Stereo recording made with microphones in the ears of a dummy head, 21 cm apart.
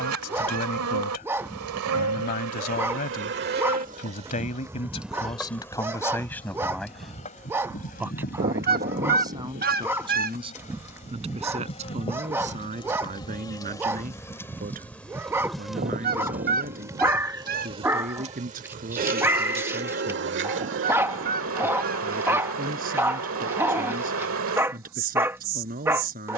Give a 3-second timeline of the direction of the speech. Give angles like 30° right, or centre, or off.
40° left, 30° left, centre, 20° right, 30° right, 40° right, 40° right, 40° right, 40° right.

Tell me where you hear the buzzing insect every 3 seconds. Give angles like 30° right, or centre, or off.
60° right, 20° right, 30° left, 30° left, 20° left, 10° right, 40° right, 60° right, 60° right.